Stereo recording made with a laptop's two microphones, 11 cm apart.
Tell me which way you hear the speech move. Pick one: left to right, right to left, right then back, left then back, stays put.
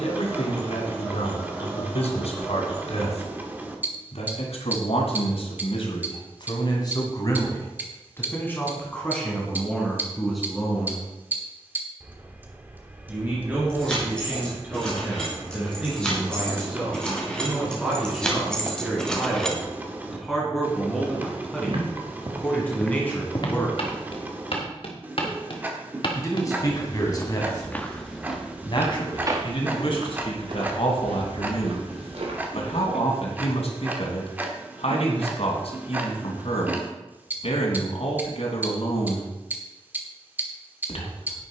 right then back.